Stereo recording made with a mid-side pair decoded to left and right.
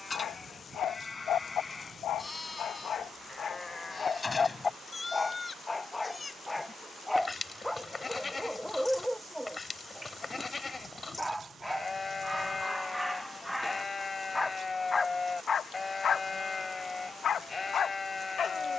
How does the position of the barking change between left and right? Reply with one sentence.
You can hear the barking move from left to right and back again.